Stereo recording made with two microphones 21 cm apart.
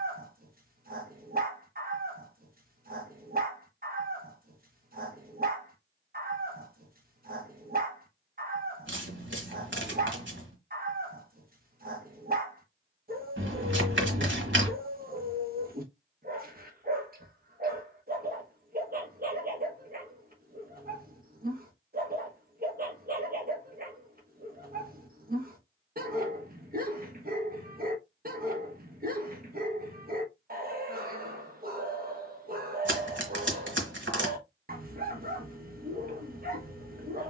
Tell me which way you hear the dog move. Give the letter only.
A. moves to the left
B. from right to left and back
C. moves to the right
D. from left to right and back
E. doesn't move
E.